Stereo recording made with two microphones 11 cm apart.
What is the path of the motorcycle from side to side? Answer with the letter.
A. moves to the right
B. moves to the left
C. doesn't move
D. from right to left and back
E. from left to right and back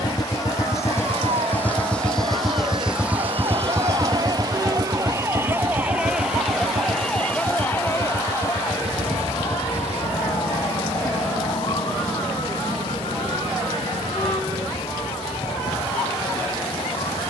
A.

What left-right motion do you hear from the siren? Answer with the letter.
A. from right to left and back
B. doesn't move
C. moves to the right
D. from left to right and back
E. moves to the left
E.